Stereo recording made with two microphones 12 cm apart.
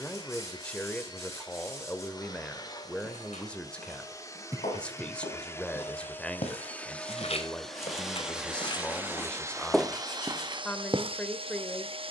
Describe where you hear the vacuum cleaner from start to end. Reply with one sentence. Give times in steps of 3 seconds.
In this clip you hear the vacuum cleaner on the left from 0 s, in the centre from 6 s and on the right from 9 s.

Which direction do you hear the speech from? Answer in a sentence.
In this clip you hear the speech in the centre.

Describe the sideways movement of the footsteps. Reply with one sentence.
In this clip you hear the footsteps move from left to right.